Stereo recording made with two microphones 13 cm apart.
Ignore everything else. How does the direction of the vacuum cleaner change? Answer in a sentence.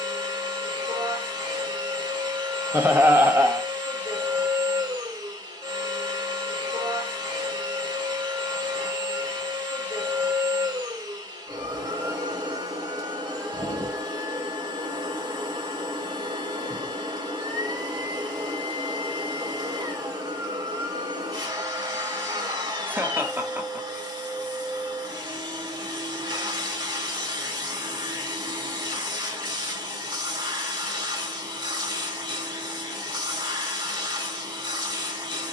In this clip you hear the vacuum cleaner stay in one place.